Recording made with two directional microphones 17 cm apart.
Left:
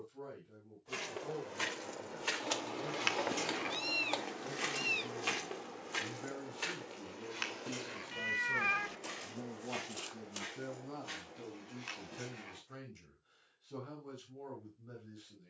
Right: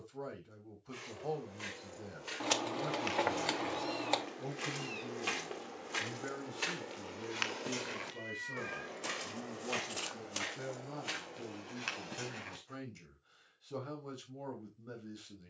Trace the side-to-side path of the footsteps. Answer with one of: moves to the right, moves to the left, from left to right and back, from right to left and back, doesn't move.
moves to the right.